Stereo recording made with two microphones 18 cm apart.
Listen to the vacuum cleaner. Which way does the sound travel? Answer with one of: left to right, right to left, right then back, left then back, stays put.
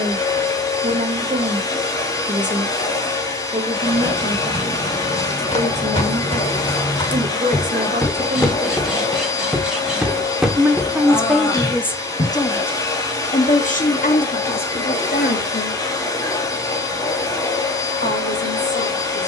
stays put.